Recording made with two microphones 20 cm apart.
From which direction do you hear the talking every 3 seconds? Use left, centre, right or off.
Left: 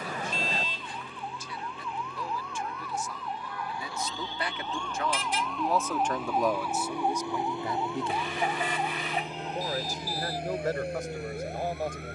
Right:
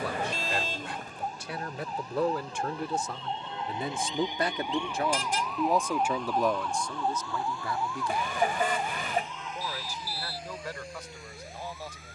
right, right, centre, left.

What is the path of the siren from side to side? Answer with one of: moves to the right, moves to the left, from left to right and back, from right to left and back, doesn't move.
moves to the left.